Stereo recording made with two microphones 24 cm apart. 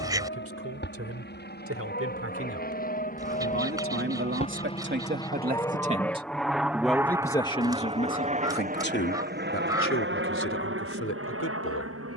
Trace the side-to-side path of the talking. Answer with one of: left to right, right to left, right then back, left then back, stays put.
right to left.